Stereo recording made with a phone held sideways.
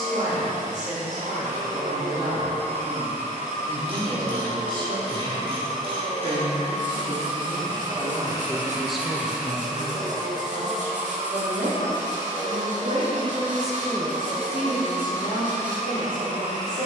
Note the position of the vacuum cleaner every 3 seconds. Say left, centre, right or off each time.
right, right, right, centre, right, right.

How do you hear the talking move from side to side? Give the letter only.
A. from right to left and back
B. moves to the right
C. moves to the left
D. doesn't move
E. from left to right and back
E.